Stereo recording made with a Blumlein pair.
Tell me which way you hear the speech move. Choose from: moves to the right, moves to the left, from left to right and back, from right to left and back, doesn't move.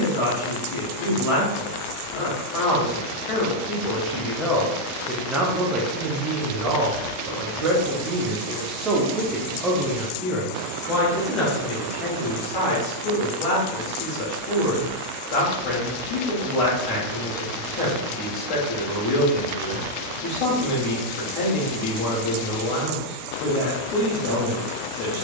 from left to right and back.